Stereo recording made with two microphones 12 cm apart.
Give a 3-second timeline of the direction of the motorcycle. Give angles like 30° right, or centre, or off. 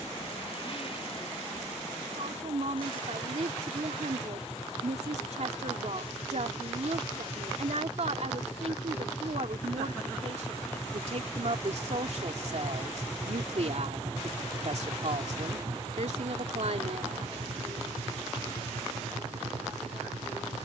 50° left, 40° left, 30° left, 20° left, 10° right, 40° right, 60° right.